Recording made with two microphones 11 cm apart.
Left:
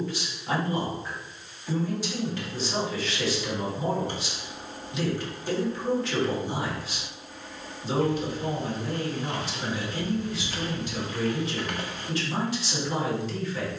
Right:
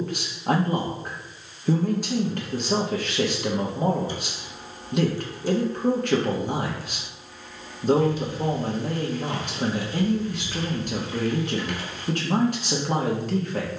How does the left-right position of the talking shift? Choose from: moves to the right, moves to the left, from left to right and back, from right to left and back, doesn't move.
doesn't move.